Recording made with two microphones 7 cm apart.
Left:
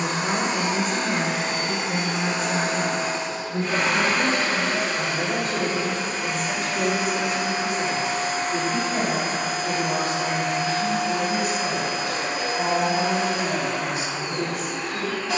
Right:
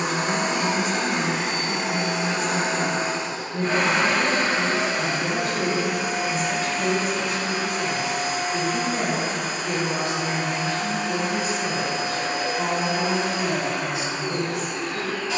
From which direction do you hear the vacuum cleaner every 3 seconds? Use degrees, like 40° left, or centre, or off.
50° right, 30° right, 20° left, 60° left, 80° left.